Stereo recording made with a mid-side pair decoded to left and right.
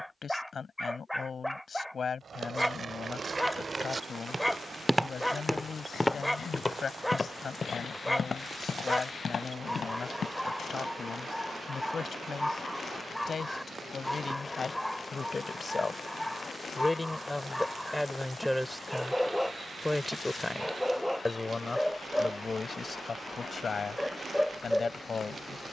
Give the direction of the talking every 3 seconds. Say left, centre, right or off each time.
left, left, left, left, left, left, centre, left, left.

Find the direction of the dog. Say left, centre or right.
centre.